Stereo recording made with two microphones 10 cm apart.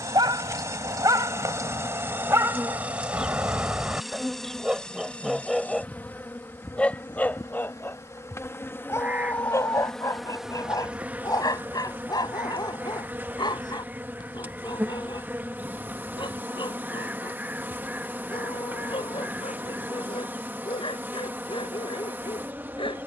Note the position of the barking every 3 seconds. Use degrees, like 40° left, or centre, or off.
40° right, 10° right, 20° left, 40° left, 50° left, 60° left, 60° left, 70° left.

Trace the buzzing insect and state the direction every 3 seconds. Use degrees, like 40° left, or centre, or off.
30° right, centre, 30° left, 10° right, 20° right, 20° right, 20° right, 20° right.